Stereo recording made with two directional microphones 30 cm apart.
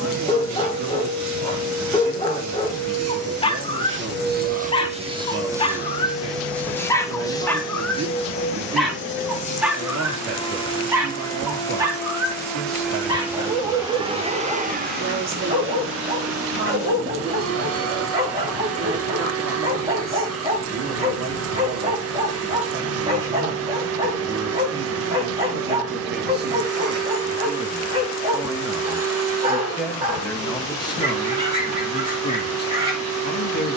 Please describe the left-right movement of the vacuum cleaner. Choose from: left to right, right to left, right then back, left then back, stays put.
left then back.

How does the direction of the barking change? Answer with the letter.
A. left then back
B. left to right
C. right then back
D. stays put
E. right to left
B.